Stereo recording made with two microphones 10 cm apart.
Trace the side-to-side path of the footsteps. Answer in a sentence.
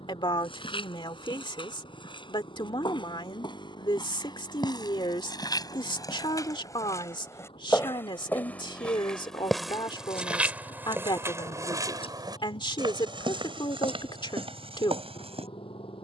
In this clip you hear the footsteps move to the right.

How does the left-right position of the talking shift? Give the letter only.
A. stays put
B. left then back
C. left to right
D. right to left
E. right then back
A.